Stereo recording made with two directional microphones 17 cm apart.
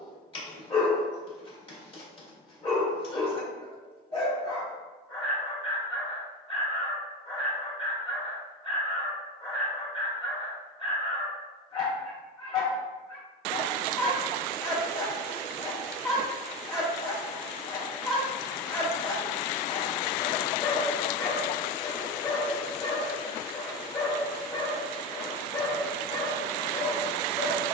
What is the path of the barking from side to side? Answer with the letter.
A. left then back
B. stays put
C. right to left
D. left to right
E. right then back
B.